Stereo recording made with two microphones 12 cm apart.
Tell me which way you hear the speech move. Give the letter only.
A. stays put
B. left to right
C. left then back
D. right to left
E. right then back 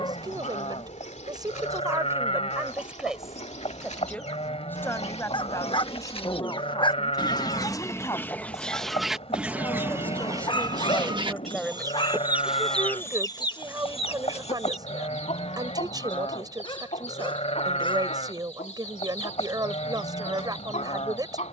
C.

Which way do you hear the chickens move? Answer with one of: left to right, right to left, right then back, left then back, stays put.
right then back.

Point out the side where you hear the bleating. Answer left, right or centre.
left.